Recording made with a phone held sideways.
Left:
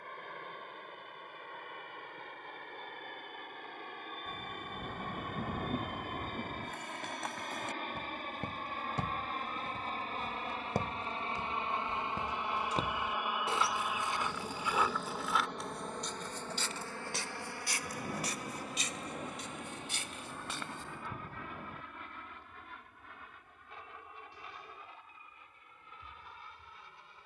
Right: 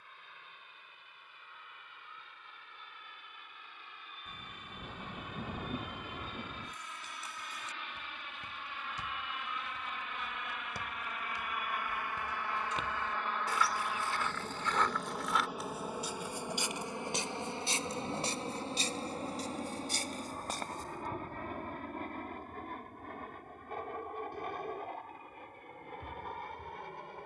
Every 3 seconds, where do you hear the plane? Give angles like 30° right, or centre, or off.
70° left, 60° left, 50° left, 40° left, 10° left, 10° right, 30° right, 50° right, 50° right.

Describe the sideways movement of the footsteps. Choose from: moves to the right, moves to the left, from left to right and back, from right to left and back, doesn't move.
moves to the right.